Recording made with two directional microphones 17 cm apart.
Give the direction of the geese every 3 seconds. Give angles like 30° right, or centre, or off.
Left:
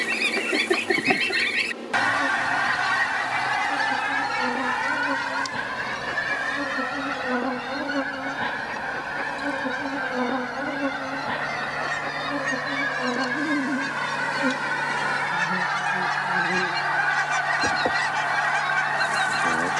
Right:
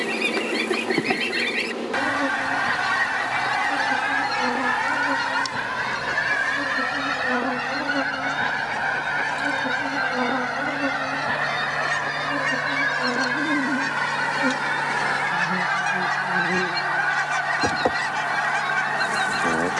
10° left, 30° right, 60° right, 60° right, 50° right, 20° right, centre.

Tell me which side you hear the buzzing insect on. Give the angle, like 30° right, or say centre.
30° right.